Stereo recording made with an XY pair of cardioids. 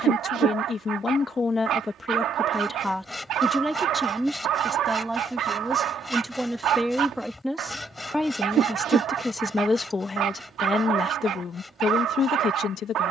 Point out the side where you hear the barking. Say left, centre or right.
right.